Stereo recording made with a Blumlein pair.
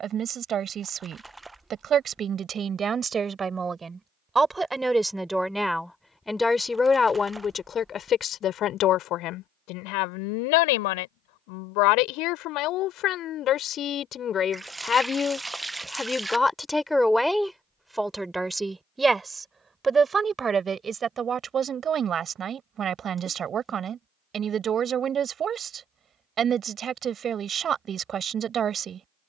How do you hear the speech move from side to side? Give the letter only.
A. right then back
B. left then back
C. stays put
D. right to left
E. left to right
B.